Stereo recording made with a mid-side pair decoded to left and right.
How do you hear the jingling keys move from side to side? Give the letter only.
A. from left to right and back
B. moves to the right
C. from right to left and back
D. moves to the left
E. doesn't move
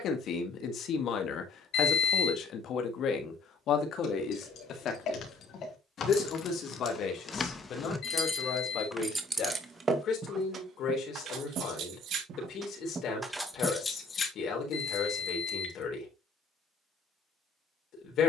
A.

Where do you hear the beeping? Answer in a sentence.
You can hear the beeping on the left.